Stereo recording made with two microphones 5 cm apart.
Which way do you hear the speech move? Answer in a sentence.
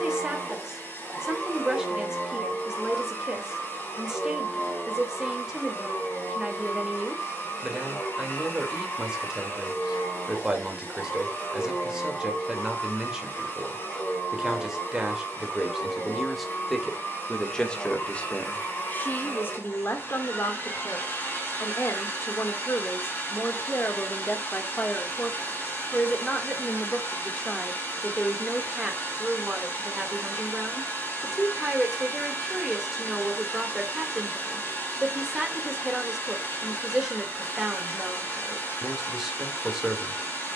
You can hear the speech go left and come back.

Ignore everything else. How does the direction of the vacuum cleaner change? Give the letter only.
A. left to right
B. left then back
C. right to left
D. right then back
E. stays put
E.